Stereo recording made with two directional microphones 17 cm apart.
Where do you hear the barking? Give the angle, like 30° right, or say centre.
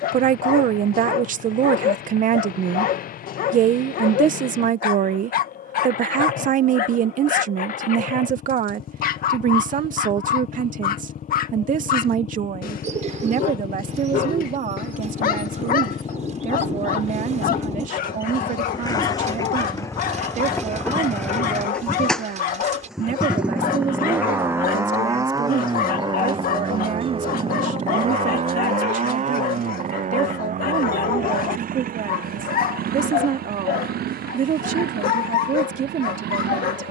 60° left.